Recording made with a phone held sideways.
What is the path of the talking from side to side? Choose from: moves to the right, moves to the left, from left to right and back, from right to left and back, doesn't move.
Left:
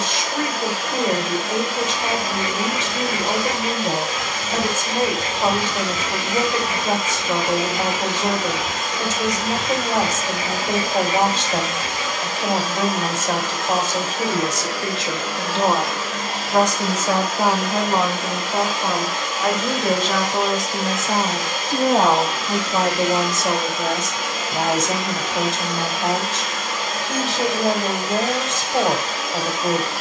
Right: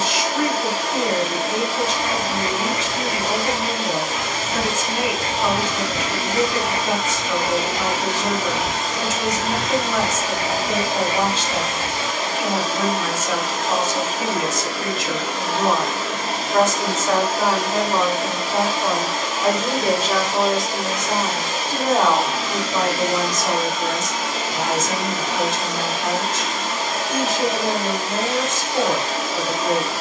from left to right and back.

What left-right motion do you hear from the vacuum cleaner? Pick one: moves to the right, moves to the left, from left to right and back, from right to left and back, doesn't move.
doesn't move.